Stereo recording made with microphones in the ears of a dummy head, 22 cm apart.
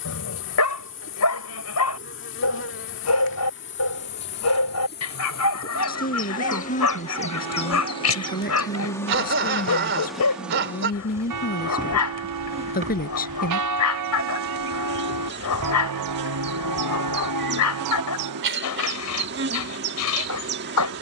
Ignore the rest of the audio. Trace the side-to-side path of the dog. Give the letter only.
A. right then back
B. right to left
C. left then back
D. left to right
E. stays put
E.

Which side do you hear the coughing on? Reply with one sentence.
You can hear the coughing on the right.